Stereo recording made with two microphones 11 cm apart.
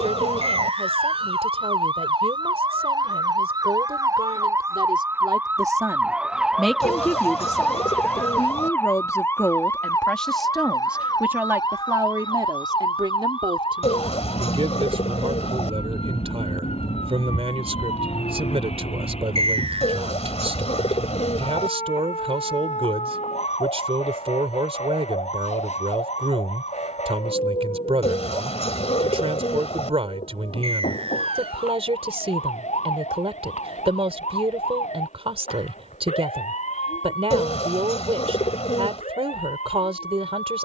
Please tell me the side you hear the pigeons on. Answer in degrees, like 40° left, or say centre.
70° left.